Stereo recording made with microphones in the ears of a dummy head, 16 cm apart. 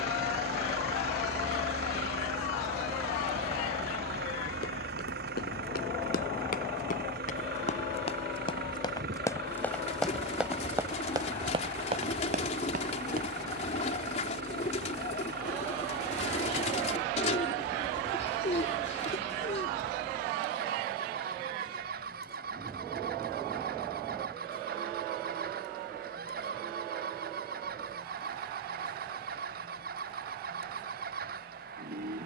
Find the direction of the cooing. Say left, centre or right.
left.